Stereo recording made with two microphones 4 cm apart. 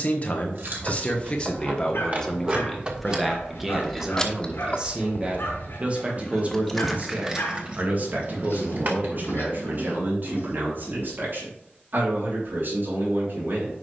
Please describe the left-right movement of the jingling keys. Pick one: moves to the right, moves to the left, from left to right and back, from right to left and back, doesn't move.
from right to left and back.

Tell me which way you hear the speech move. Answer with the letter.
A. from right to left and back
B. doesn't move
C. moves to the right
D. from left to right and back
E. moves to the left
C.